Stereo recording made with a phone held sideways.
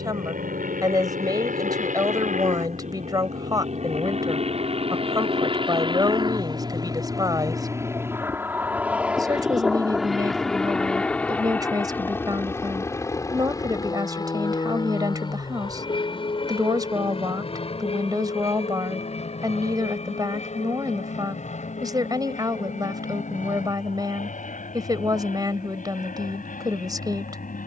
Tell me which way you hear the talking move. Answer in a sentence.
In this clip you hear the talking stay put.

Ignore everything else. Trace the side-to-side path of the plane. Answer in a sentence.
In this clip you hear the plane move from right to left.